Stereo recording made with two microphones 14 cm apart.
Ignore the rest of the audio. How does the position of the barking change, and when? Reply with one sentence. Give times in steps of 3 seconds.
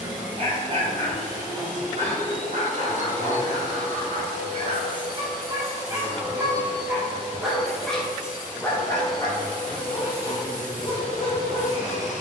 You can hear the barking on the right from 0 s, in the centre from 6 s and on the left from 9 s.